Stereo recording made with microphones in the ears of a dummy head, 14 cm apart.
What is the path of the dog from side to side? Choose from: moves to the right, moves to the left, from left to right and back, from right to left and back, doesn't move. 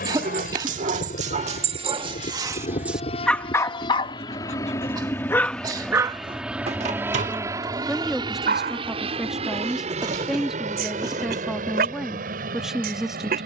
from right to left and back.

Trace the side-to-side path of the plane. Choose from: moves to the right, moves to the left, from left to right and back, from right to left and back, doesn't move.
moves to the right.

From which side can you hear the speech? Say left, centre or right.
centre.